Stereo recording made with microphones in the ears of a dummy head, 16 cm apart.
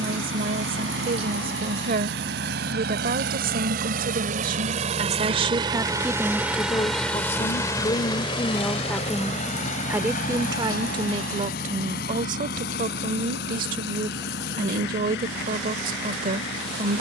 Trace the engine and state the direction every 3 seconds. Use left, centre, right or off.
right, right, centre, left, left, left.